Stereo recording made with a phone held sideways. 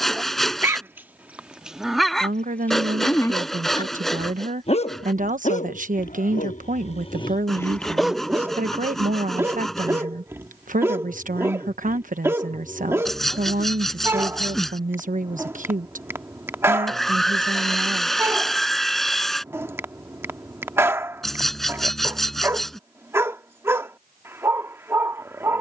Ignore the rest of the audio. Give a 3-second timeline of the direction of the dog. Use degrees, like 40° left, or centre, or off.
10° right, 40° left, 20° left, 10° right, 10° right, 10° right, 10° right, 10° right, 10° right.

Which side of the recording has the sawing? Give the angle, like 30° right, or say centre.
centre.